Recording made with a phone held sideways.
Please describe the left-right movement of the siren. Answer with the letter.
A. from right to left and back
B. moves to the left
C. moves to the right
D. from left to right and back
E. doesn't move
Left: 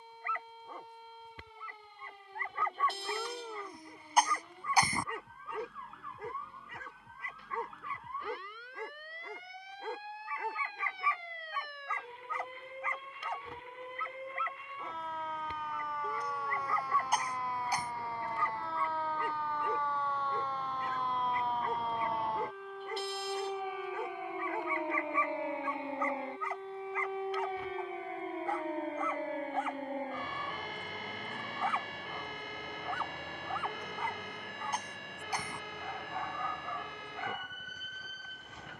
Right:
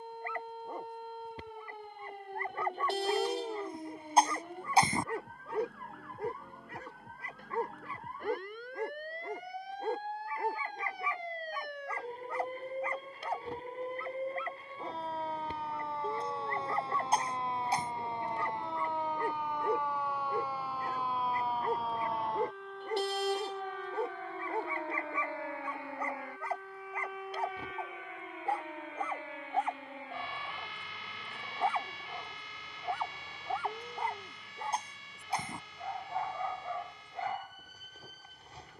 B.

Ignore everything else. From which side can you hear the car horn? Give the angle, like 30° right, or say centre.
70° right.